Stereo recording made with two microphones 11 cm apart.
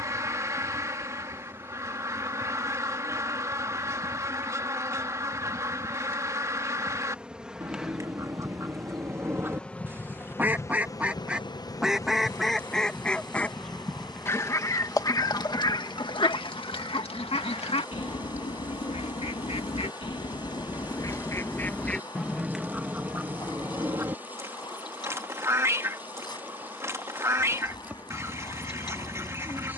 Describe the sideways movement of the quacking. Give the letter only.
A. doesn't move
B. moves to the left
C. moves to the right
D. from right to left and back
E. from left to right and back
D.